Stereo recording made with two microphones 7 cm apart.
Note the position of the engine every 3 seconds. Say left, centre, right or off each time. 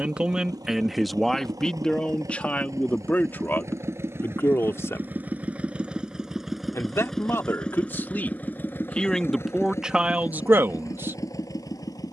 right, right, centre, left.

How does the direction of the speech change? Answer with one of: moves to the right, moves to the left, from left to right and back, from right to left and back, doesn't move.
from right to left and back.